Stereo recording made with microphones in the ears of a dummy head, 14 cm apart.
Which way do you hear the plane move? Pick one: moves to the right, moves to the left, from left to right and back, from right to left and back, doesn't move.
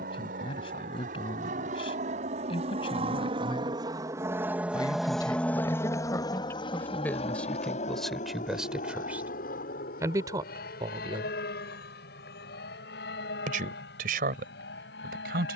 moves to the left.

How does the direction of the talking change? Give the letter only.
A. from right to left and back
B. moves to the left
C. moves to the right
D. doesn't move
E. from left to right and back
C.